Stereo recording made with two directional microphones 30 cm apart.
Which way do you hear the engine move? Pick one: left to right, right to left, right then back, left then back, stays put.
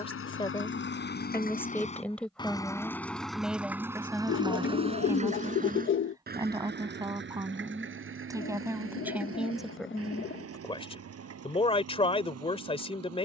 left to right.